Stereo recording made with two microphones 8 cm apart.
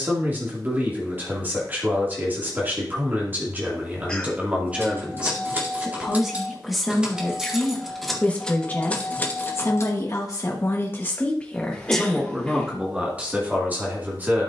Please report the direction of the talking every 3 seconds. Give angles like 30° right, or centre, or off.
30° right, 20° right, 10° left, 30° left, 10° right.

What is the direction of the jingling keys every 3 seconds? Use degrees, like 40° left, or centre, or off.
off, 30° right, centre, 30° left, off.